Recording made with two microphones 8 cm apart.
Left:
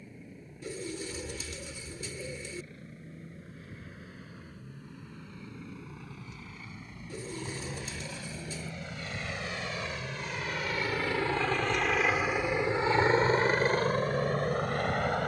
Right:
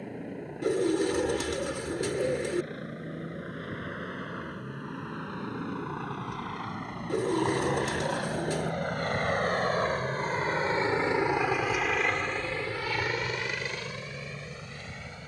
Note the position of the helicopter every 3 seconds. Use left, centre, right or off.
right, right, right, right, left.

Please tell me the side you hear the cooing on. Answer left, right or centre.
right.